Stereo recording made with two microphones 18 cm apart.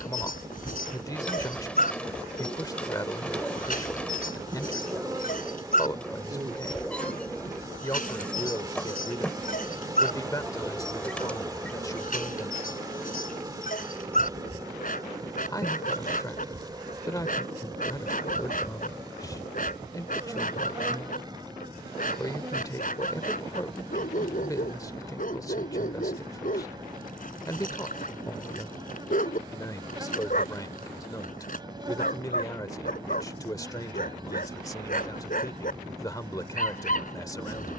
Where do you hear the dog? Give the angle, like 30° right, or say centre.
50° left.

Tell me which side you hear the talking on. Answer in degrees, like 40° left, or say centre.
20° left.